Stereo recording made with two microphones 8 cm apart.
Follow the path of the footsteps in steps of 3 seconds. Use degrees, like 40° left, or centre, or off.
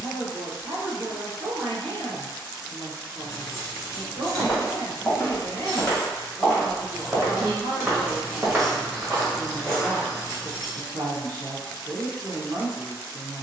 off, 30° left, 10° right, 10° left, off.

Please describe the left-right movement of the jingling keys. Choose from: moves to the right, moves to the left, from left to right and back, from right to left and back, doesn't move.
from left to right and back.